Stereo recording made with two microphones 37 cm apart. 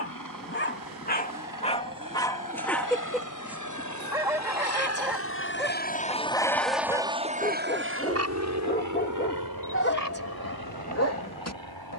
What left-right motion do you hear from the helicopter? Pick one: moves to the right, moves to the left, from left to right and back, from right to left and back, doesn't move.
moves to the right.